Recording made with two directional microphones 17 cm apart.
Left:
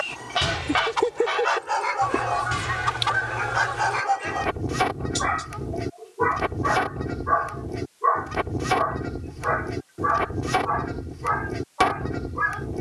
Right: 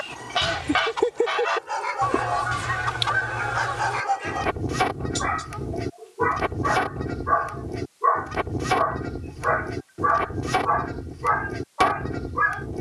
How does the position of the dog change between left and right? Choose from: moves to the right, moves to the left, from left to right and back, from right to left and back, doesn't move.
moves to the right.